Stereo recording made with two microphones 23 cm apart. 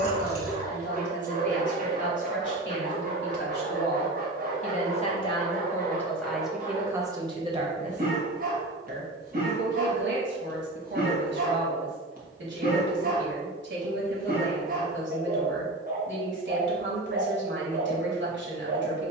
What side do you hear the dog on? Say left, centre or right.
right.